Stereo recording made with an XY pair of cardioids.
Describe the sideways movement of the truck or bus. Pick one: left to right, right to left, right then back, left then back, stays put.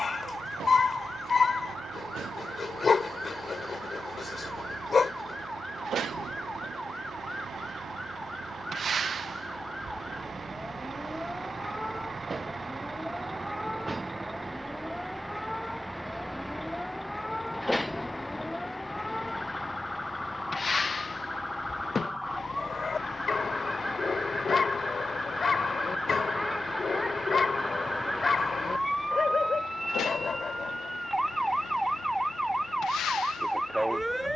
right to left.